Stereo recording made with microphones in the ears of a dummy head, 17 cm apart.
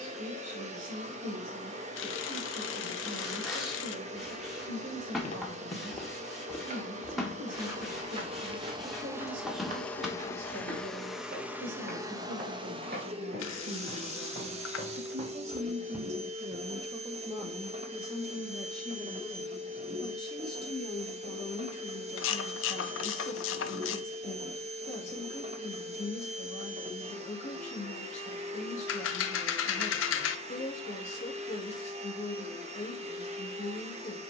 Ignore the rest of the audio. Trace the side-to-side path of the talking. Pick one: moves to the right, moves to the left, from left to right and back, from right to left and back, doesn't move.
moves to the left.